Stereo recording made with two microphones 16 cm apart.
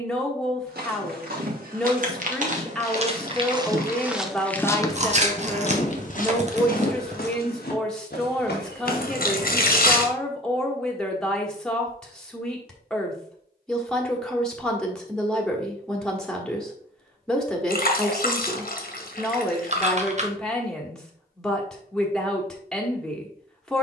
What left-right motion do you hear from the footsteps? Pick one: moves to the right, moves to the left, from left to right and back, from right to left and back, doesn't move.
moves to the left.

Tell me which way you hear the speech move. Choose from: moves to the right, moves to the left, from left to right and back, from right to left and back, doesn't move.
doesn't move.